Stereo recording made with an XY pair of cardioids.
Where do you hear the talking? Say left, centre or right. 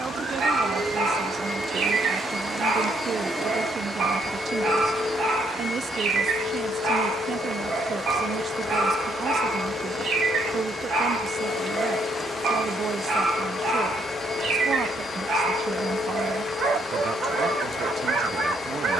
right.